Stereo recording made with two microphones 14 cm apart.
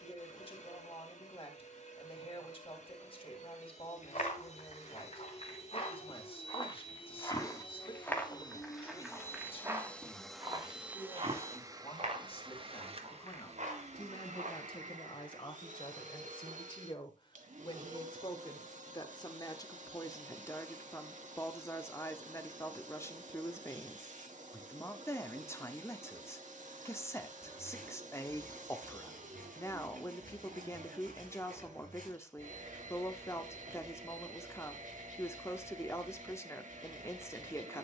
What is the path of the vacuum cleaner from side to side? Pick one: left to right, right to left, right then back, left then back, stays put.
left to right.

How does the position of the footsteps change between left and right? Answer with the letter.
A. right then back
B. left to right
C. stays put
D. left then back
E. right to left
B.